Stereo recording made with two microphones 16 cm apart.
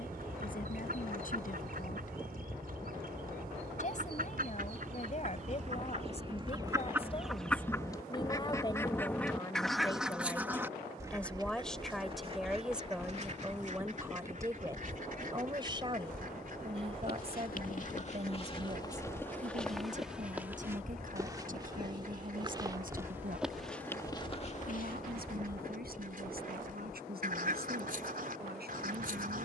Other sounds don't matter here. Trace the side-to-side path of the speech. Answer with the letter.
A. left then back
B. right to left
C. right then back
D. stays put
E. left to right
E.